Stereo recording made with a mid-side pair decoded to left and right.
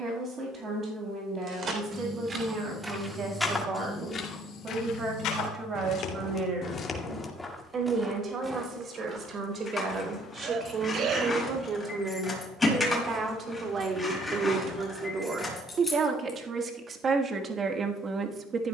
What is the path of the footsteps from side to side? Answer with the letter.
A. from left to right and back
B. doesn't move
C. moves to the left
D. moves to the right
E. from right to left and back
E.